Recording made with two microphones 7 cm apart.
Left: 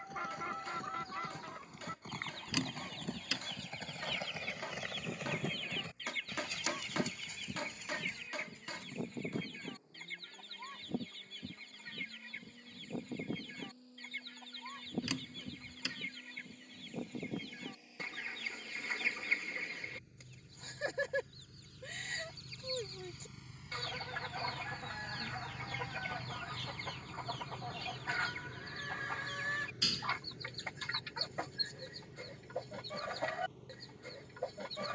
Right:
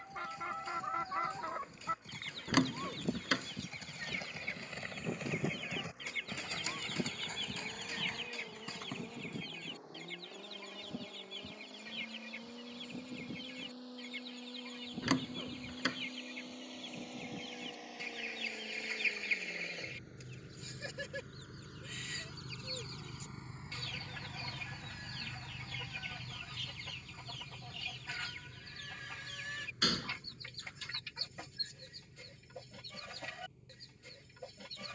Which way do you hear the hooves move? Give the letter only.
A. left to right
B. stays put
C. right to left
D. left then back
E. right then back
A.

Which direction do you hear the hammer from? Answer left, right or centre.
left.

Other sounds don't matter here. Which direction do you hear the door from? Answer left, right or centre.
right.